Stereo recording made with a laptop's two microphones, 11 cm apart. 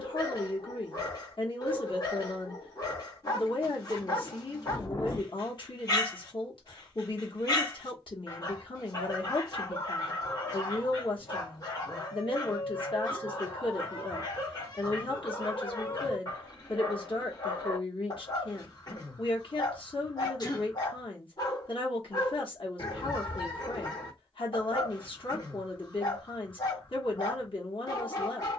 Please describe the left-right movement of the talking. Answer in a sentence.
You can hear the talking stay in one place.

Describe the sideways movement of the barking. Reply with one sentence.
In this clip you hear the barking stay in one place.